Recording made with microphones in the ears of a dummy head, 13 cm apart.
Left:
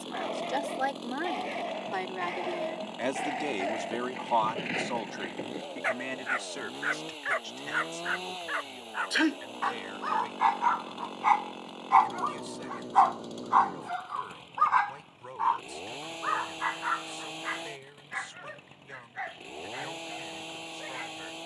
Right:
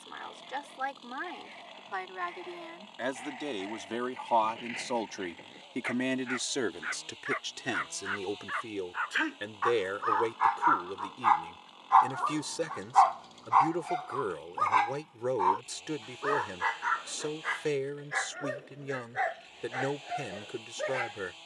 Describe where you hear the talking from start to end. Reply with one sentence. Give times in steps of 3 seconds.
In this clip you hear the talking on the left from 0 s, in the centre from 3 s and on the right from 6 s.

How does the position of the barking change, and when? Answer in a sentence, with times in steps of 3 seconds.
You can hear the barking on the left from 0 s, in the centre from 12 s and on the right from 15 s.